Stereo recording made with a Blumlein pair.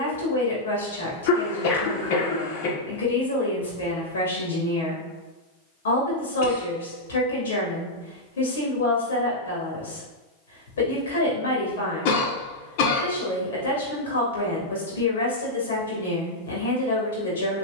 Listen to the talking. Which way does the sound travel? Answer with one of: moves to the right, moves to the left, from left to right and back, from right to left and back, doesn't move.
doesn't move.